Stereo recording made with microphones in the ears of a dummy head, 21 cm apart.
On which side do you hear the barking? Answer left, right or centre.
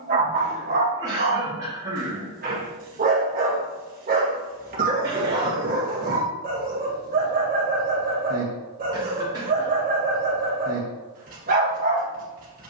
right.